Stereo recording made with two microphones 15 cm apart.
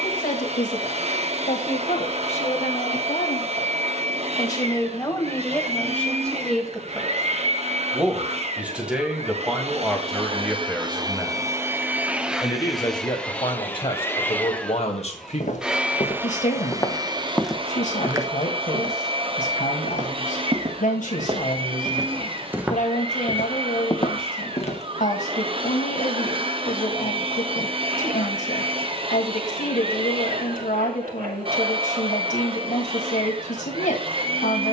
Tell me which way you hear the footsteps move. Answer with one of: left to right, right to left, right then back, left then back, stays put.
right then back.